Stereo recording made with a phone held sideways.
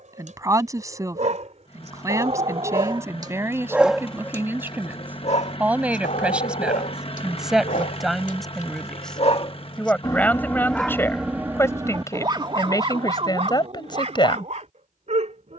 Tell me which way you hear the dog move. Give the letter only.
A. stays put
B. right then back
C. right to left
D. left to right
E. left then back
E.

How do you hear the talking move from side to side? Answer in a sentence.
You can hear the talking move from right to left.